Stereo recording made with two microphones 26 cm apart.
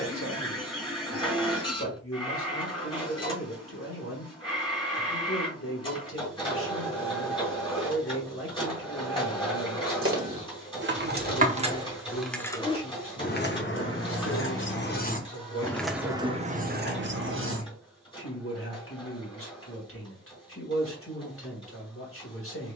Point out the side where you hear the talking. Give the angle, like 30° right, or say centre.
60° left.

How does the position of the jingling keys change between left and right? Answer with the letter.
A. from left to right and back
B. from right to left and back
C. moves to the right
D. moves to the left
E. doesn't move
B.